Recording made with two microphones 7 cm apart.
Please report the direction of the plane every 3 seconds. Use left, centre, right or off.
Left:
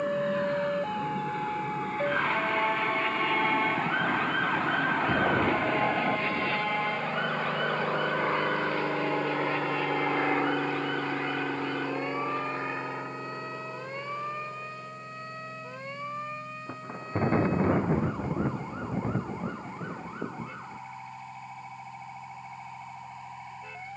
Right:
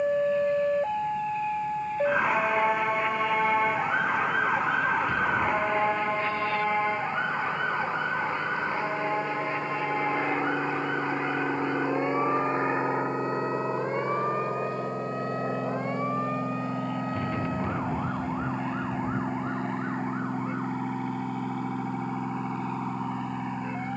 left, left, left, centre, right, right, right, right.